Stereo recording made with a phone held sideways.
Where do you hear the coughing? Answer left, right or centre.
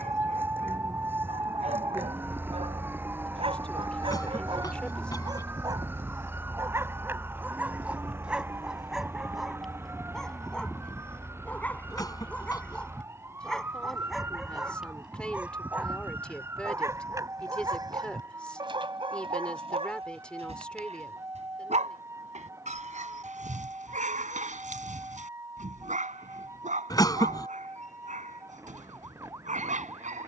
left.